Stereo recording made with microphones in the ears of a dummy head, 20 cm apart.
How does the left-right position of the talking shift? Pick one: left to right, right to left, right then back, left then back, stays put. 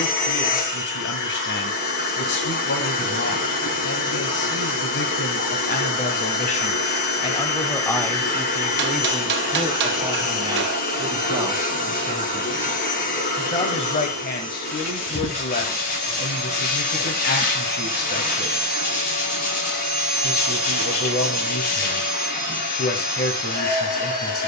right then back.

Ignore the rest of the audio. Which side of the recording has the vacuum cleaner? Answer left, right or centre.
left.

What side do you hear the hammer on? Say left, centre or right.
right.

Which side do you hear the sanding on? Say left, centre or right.
left.